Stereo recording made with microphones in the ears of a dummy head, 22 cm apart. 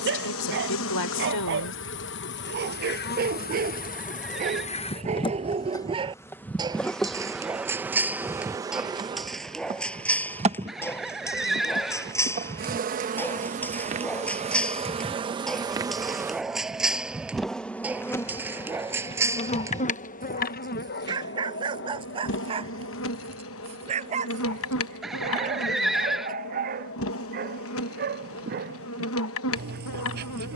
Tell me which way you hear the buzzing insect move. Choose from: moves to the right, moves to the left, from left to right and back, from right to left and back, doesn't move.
from left to right and back.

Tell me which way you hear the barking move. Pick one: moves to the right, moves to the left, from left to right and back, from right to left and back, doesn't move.
from right to left and back.